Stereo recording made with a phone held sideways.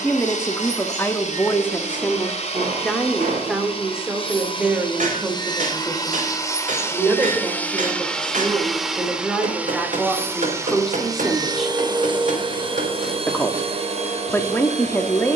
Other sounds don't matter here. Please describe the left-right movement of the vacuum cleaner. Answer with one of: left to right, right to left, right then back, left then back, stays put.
left to right.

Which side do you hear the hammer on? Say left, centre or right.
right.